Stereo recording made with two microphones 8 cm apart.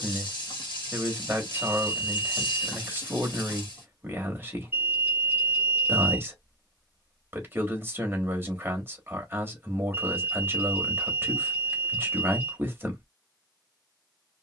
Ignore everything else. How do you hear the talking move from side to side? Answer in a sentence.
In this clip you hear the talking stay put.